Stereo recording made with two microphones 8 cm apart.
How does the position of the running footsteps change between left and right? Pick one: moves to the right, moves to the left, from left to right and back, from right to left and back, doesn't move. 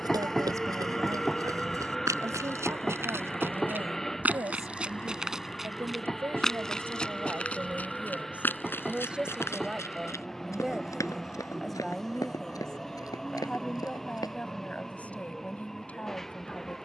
moves to the left.